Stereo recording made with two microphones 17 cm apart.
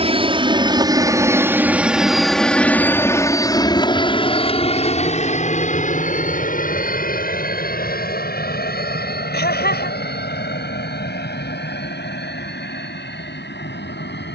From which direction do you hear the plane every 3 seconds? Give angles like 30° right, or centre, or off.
10° right, 30° left, 50° left, 60° left, 70° left.